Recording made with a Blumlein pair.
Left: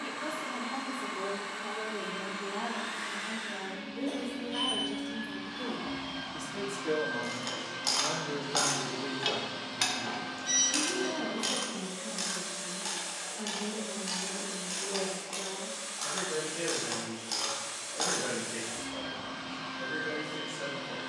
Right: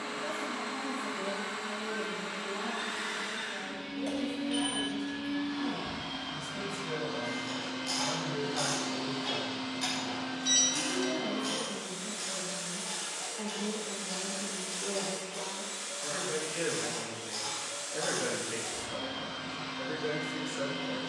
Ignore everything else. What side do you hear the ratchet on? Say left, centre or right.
left.